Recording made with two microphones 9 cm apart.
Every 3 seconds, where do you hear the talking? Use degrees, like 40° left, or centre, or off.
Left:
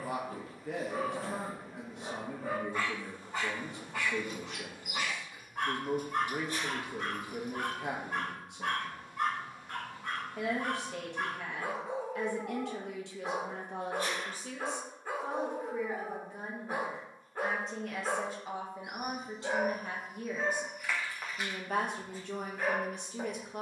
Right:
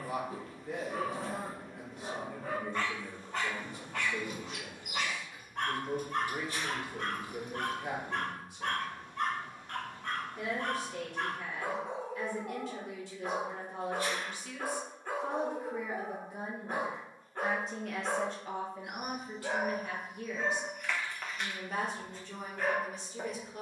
70° left, 70° left, 70° left, 70° left, 60° left, 10° right, 20° left, 60° left.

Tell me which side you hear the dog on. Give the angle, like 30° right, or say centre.
10° left.